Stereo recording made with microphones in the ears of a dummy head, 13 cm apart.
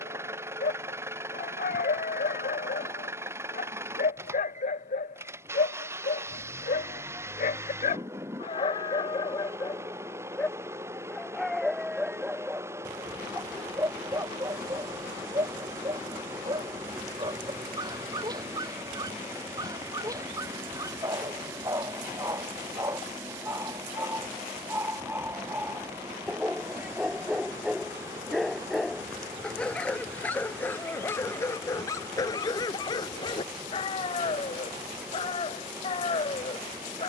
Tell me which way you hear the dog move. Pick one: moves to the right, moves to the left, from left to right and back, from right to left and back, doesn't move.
from left to right and back.